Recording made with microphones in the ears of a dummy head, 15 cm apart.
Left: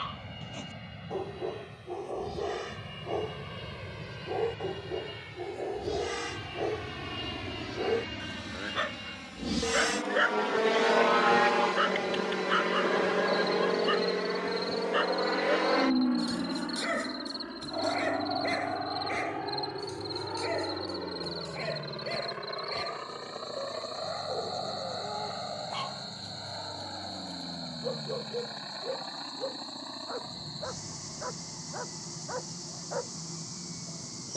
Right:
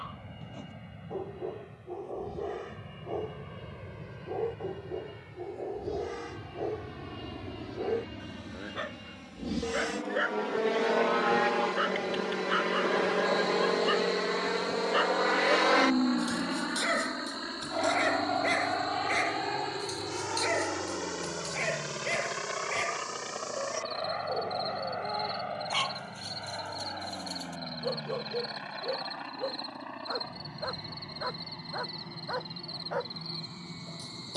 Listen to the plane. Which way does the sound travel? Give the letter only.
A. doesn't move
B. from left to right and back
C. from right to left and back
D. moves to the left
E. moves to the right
E.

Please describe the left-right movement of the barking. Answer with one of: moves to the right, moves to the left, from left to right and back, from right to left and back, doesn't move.
moves to the right.